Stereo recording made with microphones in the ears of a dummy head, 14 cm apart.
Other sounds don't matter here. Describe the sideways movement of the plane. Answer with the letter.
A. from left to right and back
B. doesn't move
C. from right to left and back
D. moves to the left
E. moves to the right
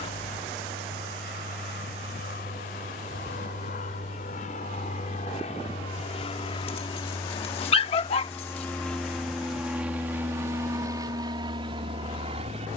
E.